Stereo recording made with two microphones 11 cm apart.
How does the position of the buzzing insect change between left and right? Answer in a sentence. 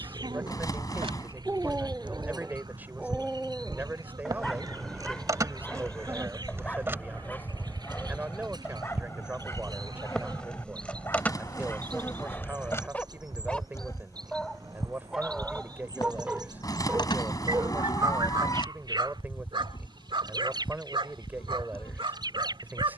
You can hear the buzzing insect go from the right side to the left.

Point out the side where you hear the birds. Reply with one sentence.
In this clip you hear the birds on the right.